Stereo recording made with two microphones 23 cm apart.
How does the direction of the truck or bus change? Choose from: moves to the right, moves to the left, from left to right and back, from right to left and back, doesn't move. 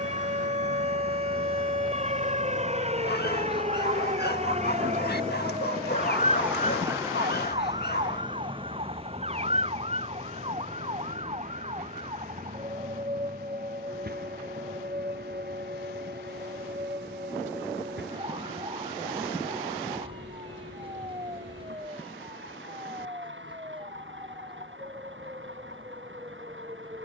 moves to the right.